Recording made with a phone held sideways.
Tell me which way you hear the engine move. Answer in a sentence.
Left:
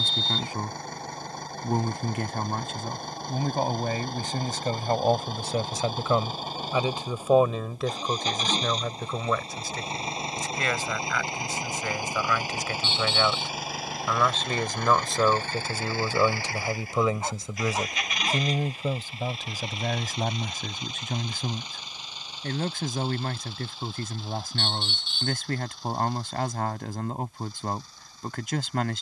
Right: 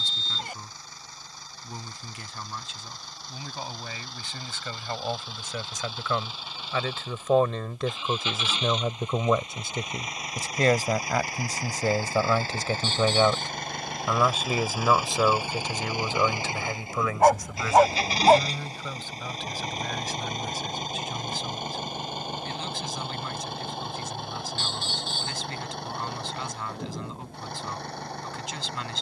You can hear the engine move from left to right.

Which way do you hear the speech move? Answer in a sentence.
You can hear the speech move from left to right and back again.